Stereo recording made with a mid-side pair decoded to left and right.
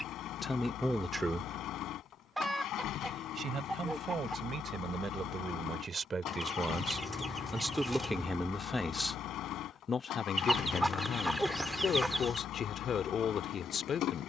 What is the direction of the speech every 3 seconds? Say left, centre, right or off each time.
centre, right, centre, left, left.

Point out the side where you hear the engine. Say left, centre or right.
left.